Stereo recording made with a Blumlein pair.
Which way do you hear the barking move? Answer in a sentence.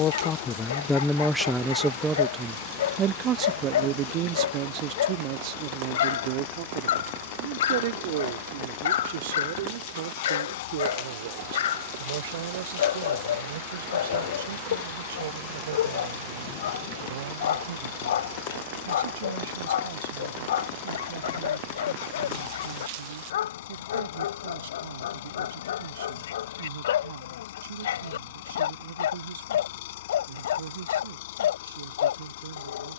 You can hear the barking stay in one place.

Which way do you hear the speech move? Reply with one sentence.
You can hear the speech go from the left side to the right.